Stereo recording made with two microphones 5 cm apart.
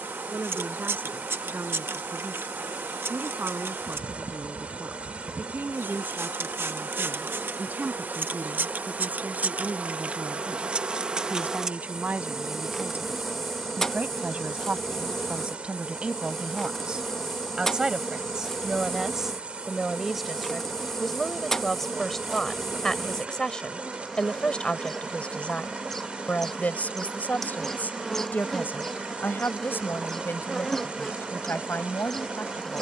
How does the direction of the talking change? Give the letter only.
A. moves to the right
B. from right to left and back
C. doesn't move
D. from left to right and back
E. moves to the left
E.